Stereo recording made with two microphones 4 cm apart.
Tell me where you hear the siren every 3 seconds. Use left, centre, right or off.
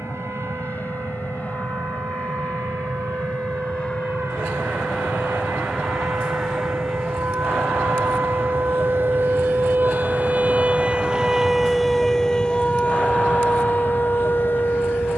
right, right, right, right, left.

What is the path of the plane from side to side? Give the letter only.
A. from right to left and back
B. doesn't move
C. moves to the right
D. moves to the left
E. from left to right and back
C.